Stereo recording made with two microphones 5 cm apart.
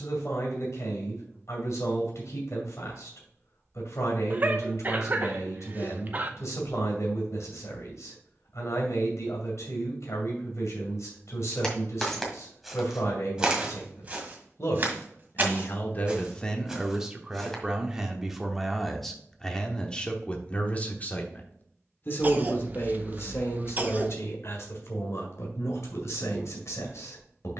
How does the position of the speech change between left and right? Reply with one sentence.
In this clip you hear the speech go right and come back.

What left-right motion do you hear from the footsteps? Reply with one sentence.
You can hear the footsteps go right and come back.